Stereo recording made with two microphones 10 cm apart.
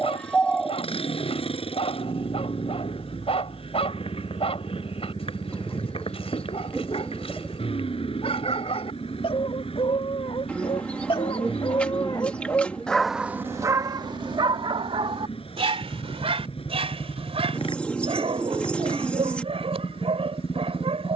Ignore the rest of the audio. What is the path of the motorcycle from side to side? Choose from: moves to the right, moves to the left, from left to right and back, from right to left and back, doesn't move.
doesn't move.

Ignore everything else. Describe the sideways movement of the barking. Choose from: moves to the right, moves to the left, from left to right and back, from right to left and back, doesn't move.
moves to the right.